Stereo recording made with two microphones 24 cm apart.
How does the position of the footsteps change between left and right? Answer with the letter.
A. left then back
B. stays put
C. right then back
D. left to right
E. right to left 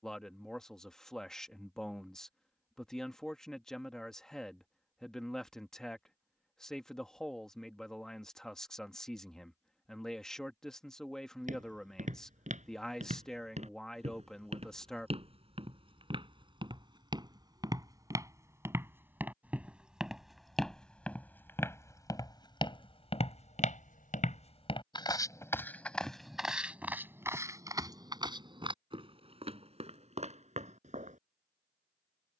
A.